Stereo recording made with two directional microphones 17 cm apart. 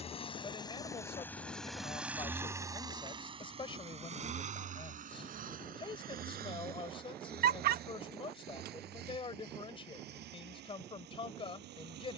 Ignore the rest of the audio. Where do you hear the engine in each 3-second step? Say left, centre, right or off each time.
centre, right, right, right.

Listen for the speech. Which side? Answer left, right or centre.
left.